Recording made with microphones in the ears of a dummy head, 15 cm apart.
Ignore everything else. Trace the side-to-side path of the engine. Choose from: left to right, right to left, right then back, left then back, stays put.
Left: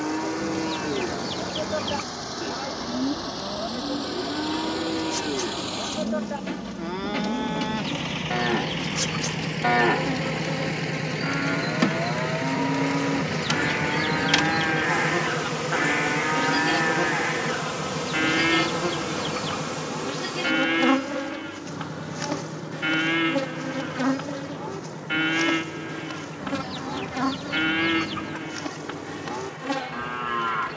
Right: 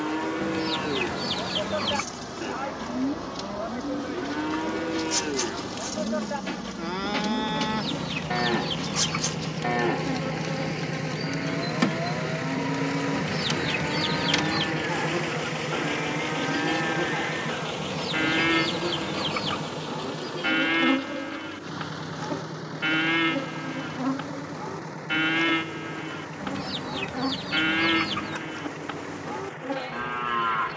left to right.